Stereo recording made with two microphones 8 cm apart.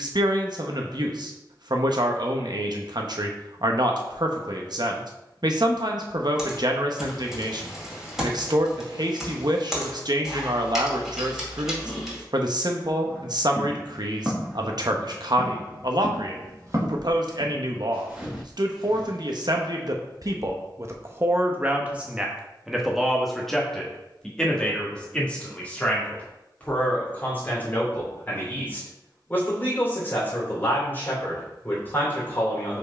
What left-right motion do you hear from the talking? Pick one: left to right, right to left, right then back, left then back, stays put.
right to left.